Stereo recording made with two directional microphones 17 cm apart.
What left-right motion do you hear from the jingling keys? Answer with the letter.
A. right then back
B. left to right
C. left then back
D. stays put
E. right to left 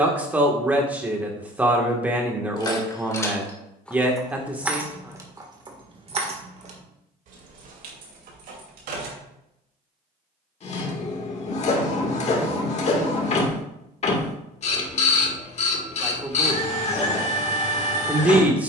B.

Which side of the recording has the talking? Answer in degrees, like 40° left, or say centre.
10° right.